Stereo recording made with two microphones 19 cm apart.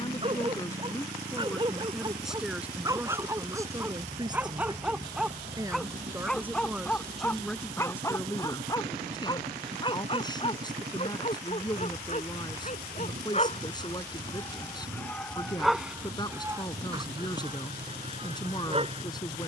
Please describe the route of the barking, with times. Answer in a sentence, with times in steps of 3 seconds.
You can hear the barking on the right from 0 s, in the centre from 3 s, on the left from 9 s, in the centre from 15 s and on the right from 18 s.